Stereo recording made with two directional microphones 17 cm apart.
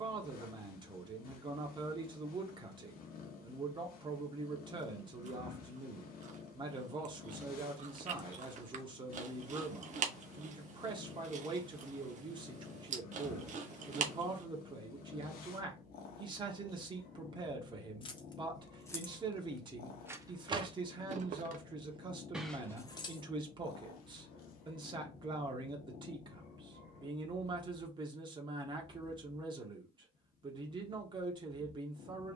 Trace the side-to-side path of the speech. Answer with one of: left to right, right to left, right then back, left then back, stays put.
stays put.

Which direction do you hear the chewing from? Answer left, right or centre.
right.